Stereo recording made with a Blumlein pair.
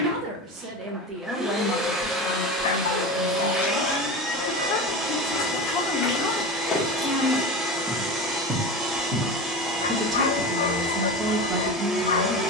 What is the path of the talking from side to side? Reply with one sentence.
In this clip you hear the talking move from right to left and back again.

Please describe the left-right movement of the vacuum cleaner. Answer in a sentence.
You can hear the vacuum cleaner stay in one place.